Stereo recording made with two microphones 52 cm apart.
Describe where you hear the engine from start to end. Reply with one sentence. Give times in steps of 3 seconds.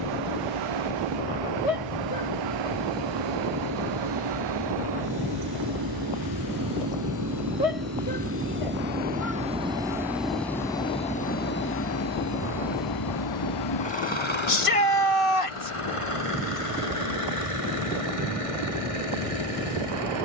You can hear the engine on the right from 0 s, in the centre from 9 s and on the left from 12 s.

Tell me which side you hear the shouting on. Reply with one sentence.
You can hear the shouting on the left.